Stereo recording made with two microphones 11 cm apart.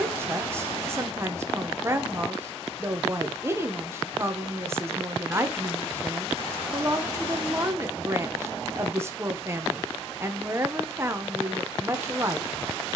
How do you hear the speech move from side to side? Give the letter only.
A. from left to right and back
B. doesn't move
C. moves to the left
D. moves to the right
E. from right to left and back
B.